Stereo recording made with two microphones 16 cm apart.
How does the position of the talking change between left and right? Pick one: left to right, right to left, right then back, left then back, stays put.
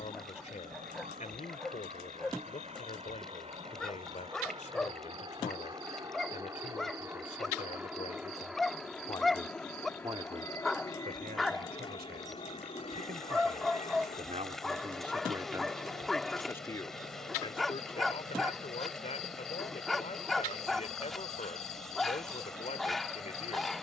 right then back.